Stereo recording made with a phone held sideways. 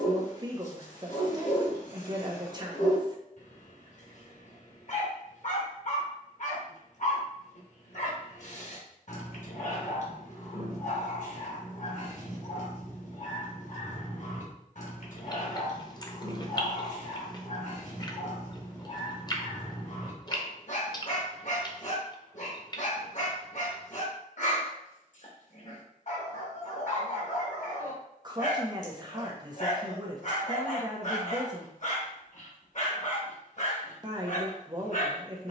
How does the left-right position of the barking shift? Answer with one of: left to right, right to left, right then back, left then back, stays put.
stays put.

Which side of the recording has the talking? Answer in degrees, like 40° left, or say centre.
30° right.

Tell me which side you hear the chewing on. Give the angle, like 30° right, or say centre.
30° left.